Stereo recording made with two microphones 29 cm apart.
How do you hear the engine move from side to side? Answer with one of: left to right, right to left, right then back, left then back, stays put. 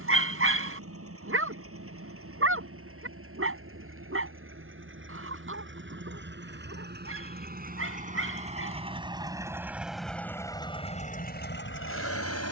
right to left.